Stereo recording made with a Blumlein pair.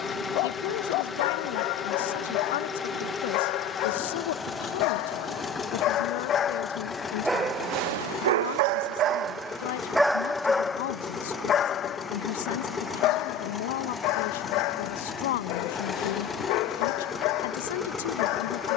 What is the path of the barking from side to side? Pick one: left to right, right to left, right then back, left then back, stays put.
right then back.